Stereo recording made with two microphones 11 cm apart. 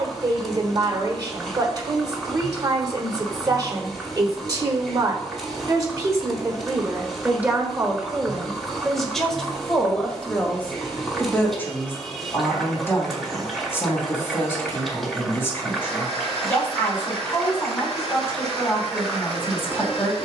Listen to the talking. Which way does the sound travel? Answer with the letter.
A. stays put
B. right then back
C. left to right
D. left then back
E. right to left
E.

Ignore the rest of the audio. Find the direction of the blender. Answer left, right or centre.
left.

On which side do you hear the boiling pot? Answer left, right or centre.
centre.